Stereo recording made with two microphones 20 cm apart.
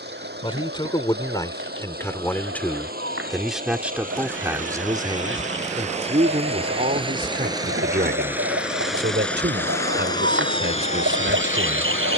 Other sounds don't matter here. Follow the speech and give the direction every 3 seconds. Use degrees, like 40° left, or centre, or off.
20° left, 10° right, 40° right, 60° right.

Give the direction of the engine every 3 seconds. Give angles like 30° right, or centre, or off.
50° right, 40° right, 20° right, 20° left.